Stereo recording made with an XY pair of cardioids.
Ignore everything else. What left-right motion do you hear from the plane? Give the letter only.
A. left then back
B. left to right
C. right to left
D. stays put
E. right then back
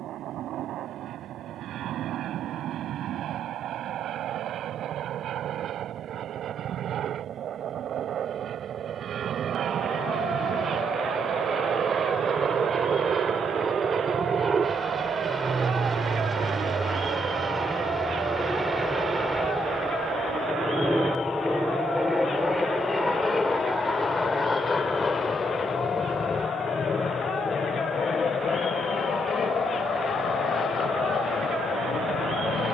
C.